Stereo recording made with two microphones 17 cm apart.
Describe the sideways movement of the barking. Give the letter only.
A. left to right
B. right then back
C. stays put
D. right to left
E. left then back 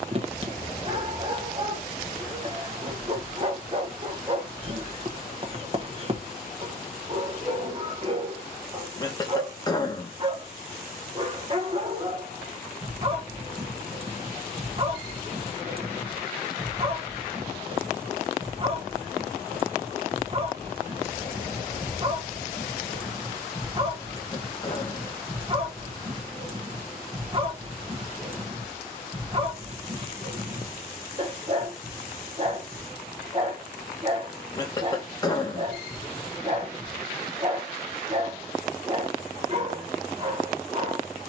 C.